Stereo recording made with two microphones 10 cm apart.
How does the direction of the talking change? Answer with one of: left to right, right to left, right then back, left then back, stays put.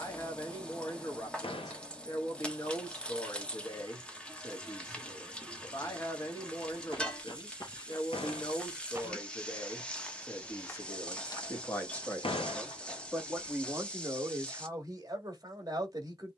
left to right.